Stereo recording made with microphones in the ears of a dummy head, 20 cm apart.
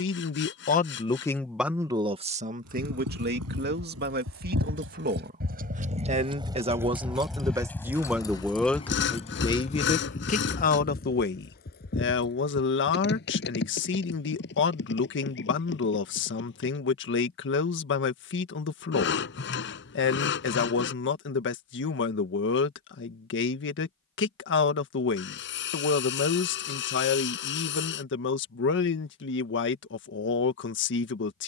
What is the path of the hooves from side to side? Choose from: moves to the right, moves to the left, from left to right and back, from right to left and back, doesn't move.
moves to the left.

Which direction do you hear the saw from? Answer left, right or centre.
left.